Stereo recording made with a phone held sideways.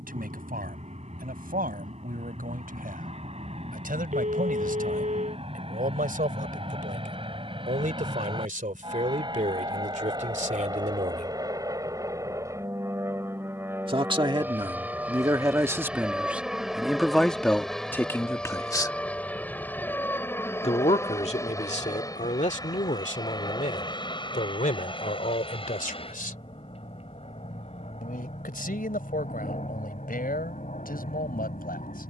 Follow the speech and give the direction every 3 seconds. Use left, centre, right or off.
right, right, right, right, right, centre, left, left, left, left, left.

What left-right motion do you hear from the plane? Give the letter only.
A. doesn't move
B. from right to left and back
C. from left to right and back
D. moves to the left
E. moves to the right
D.